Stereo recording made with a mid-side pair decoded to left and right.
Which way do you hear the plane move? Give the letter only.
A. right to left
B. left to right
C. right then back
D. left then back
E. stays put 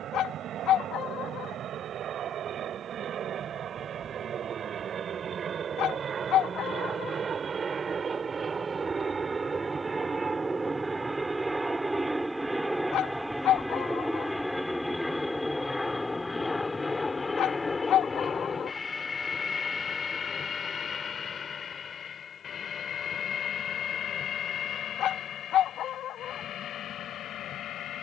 A.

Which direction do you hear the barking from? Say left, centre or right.
left.